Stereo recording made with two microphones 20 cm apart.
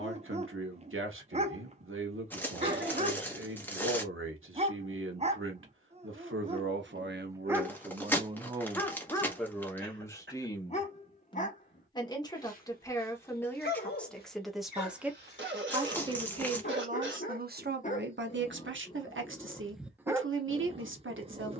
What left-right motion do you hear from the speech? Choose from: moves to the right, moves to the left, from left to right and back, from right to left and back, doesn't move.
from right to left and back.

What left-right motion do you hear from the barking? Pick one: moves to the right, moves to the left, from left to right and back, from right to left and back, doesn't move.
from right to left and back.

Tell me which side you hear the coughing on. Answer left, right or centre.
right.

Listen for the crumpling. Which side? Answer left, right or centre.
centre.